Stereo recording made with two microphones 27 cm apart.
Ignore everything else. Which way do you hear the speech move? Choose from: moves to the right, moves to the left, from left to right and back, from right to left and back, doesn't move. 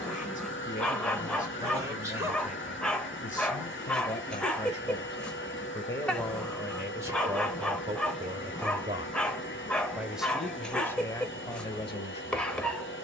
from left to right and back.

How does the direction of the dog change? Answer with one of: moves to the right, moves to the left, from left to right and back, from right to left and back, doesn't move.
doesn't move.